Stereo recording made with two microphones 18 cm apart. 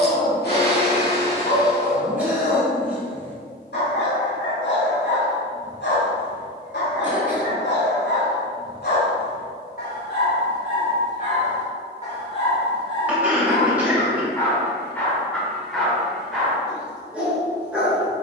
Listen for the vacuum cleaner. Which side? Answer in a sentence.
In this clip you hear the vacuum cleaner on the left.